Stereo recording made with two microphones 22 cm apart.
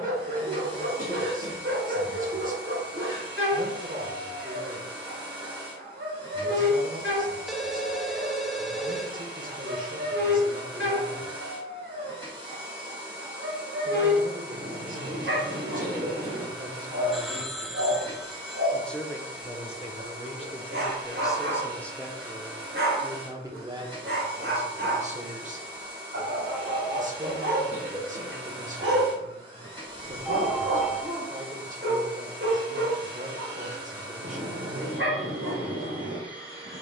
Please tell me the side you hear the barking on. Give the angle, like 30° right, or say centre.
70° right.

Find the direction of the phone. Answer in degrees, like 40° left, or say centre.
centre.